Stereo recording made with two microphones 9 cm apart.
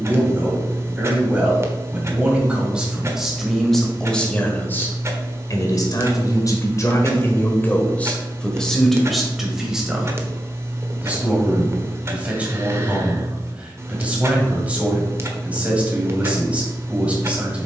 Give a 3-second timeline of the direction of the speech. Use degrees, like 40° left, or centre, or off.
20° right, 20° left, 20° left, 10° right, 20° right, 20° right.